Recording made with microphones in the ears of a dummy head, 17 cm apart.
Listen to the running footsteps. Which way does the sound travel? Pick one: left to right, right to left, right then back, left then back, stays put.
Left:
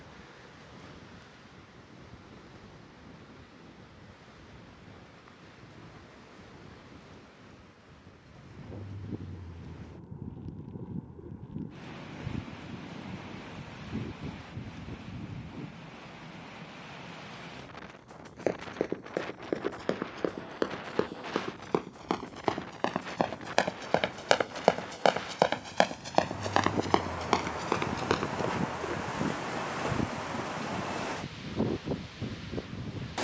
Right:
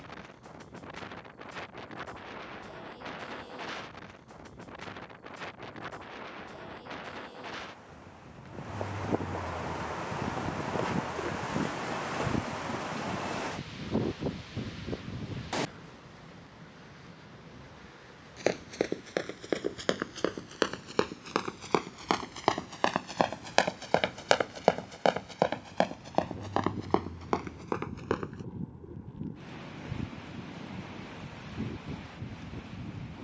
right to left.